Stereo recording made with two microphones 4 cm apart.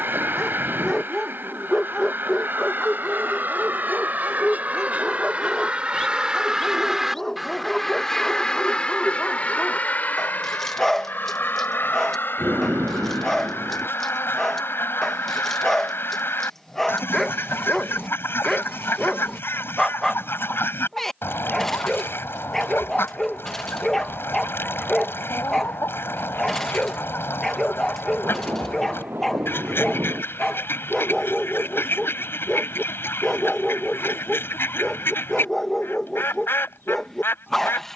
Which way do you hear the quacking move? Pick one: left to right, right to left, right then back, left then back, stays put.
right to left.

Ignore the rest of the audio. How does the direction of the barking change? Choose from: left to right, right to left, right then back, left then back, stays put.
stays put.